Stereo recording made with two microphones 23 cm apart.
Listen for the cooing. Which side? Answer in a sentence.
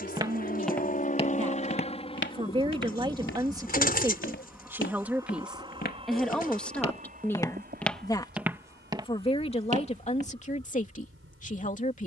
In this clip you hear the cooing on the left.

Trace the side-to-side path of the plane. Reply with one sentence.
In this clip you hear the plane go from the left side to the right.